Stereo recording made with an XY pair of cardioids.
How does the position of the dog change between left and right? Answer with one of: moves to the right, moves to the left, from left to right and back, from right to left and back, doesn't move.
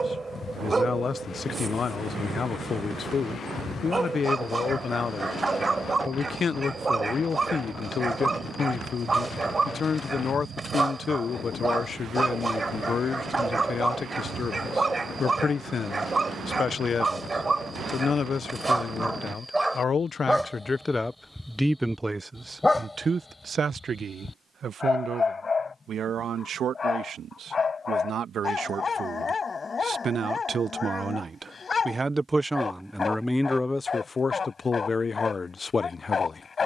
moves to the left.